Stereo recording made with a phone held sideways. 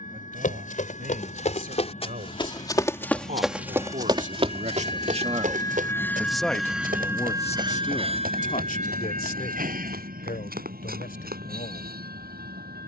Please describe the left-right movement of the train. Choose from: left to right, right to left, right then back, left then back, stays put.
left to right.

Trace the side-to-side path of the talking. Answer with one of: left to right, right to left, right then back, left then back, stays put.
right to left.